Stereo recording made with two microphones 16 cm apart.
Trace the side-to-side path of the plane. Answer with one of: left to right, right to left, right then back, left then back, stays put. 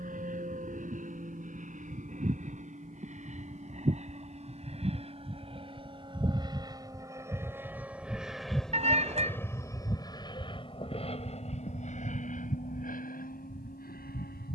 right to left.